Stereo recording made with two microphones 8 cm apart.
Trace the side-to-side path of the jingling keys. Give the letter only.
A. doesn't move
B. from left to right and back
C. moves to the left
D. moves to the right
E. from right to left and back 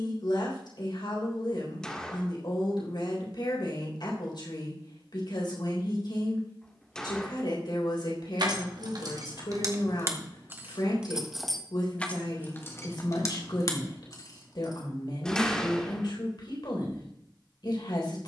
C.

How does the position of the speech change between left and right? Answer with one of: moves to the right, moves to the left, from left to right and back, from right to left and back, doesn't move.
doesn't move.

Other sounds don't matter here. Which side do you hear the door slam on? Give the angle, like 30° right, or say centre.
10° left.